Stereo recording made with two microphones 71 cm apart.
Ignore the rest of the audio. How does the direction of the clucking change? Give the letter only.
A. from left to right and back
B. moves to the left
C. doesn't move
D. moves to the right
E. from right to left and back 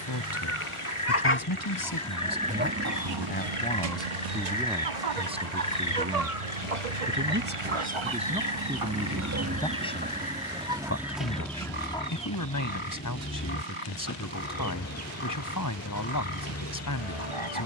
A.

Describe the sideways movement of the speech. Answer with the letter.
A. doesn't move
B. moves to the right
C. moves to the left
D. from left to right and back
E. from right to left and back
D.